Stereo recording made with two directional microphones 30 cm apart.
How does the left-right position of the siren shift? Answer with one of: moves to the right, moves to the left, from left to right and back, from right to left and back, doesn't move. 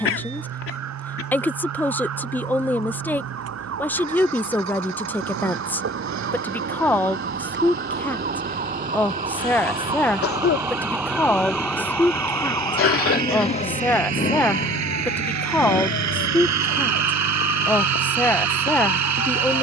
moves to the left.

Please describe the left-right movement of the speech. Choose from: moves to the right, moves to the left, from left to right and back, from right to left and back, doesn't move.
doesn't move.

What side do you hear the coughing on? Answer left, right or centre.
left.